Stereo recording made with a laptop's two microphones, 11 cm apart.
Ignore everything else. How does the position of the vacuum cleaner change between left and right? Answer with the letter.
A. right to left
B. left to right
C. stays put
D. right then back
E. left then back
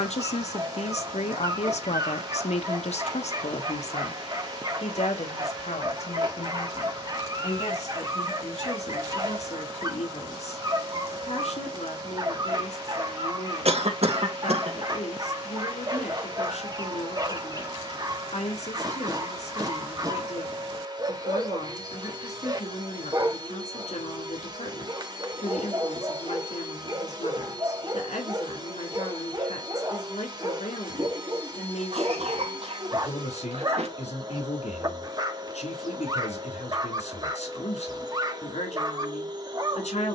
C.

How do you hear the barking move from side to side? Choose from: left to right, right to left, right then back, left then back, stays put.
stays put.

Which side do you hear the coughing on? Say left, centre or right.
right.